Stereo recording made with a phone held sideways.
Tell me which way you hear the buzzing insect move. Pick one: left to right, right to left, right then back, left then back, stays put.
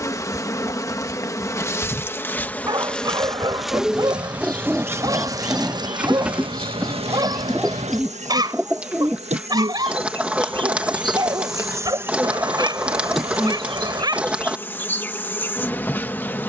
right then back.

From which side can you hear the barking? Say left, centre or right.
right.